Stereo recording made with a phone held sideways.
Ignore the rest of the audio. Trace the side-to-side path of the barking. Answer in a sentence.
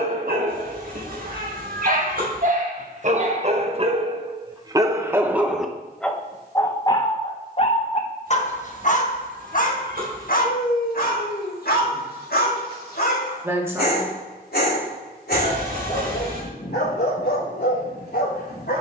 In this clip you hear the barking travel towards the left.